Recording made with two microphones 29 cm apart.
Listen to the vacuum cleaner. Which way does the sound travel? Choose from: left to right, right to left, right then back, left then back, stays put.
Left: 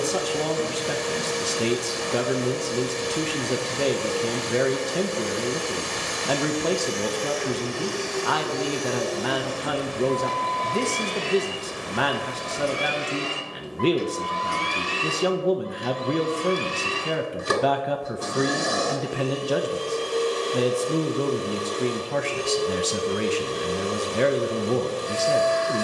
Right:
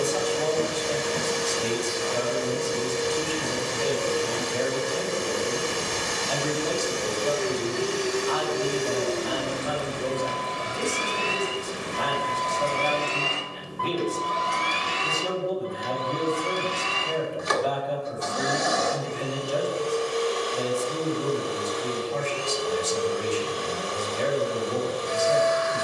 right to left.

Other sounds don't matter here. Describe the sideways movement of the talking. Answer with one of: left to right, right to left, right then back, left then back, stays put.
stays put.